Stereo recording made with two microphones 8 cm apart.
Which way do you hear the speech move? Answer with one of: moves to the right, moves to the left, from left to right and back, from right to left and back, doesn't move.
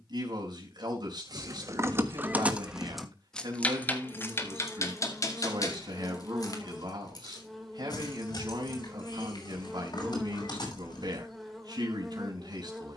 doesn't move.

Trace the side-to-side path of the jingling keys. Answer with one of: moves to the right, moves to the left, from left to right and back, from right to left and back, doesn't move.
moves to the left.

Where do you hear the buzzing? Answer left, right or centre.
centre.